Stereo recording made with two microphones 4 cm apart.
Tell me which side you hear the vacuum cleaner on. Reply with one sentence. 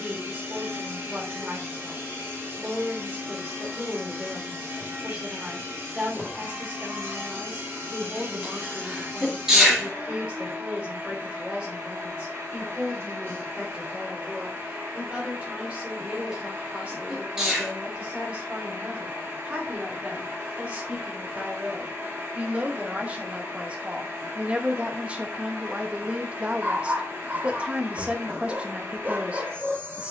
You can hear the vacuum cleaner on the right.